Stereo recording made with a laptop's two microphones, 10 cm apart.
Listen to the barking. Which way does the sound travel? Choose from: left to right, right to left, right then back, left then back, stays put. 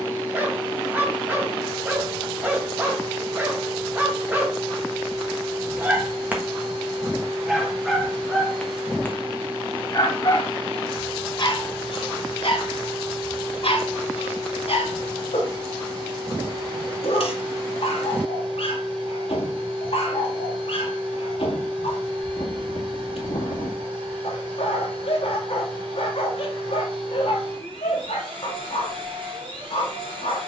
right to left.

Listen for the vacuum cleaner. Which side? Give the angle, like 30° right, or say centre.
60° right.